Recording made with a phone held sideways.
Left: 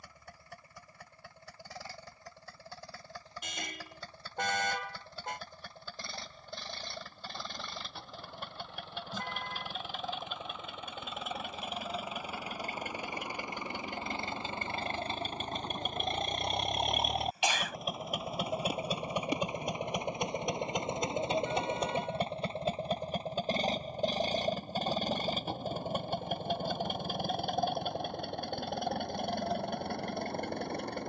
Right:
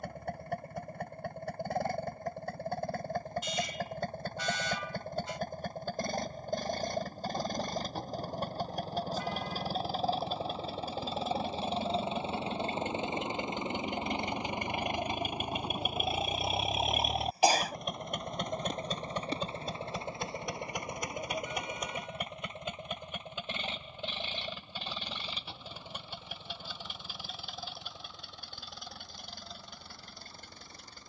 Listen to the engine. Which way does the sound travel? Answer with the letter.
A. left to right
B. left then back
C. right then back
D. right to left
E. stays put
D.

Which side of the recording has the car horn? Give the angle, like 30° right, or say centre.
60° left.